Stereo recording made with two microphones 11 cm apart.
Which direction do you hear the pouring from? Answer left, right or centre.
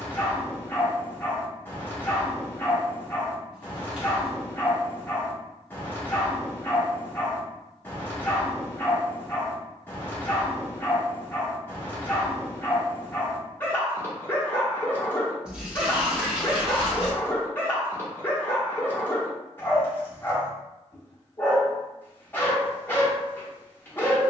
centre.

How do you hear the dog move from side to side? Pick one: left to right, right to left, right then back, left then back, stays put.
stays put.